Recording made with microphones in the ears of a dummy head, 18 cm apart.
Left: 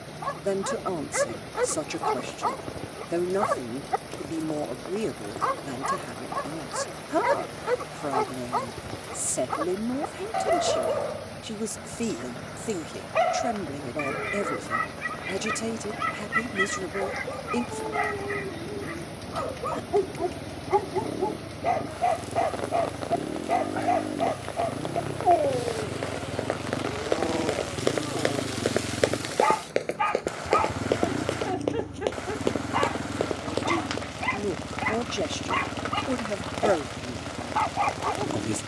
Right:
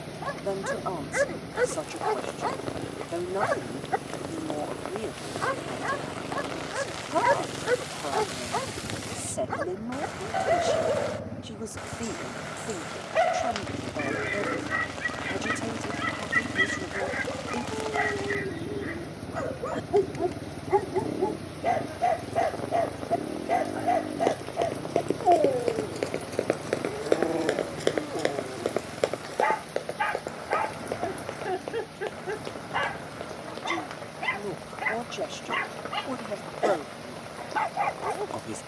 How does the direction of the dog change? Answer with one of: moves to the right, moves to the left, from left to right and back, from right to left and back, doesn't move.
doesn't move.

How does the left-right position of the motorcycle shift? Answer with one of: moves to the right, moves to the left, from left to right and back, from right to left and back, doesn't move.
moves to the left.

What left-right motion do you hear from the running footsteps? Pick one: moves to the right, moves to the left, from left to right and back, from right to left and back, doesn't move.
moves to the left.